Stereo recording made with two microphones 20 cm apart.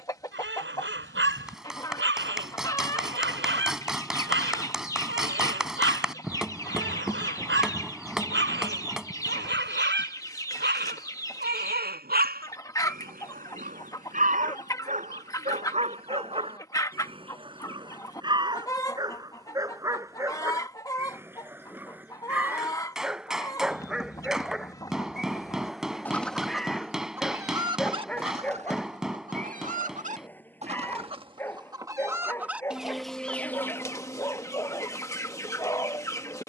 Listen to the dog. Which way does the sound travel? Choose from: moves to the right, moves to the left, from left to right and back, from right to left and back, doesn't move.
moves to the left.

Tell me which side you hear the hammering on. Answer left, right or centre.
centre.